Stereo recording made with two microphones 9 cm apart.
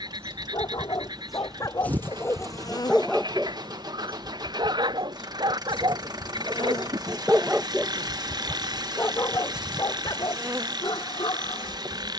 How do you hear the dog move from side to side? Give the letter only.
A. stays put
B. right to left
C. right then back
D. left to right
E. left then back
C.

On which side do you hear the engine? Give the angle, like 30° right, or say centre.
50° right.